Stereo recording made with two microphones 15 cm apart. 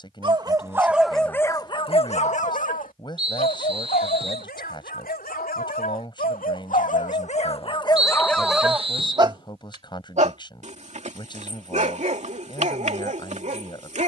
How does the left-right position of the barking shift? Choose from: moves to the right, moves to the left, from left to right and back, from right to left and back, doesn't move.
from right to left and back.